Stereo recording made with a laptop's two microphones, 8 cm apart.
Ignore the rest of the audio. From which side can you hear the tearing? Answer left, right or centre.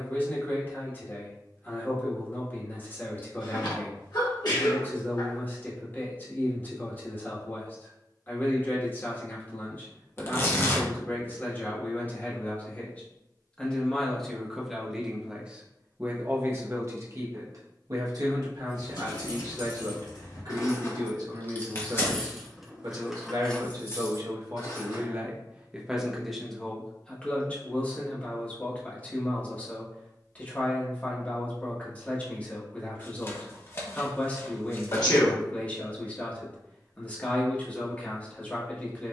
left.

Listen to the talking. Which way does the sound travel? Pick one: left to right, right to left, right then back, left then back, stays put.
right then back.